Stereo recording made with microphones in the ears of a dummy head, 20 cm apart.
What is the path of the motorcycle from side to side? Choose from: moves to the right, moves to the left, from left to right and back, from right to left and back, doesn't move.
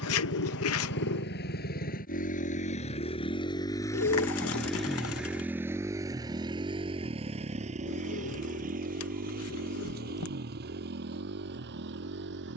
moves to the right.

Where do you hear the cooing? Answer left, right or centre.
left.